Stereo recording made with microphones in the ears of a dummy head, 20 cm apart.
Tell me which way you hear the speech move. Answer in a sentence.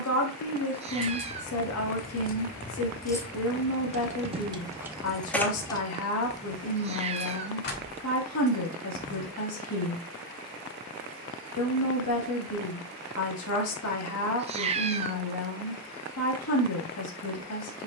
In this clip you hear the speech stay put.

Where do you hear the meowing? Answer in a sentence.
In this clip you hear the meowing on the right.